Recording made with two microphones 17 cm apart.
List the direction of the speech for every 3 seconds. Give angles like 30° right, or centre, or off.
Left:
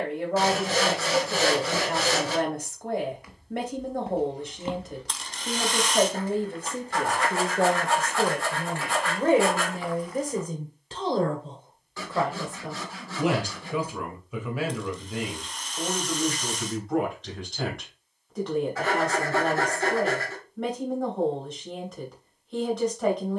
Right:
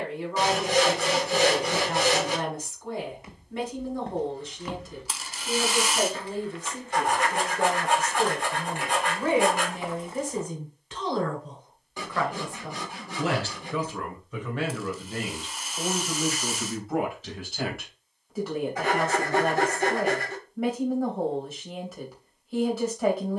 70° left, 70° left, 60° left, 40° left, 10° left, centre, 10° right, 10° right.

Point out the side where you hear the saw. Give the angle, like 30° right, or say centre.
20° right.